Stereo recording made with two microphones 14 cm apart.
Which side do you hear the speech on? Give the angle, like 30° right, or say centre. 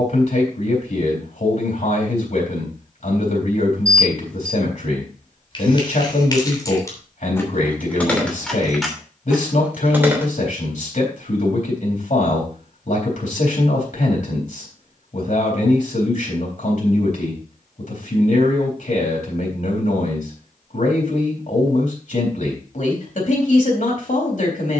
60° left.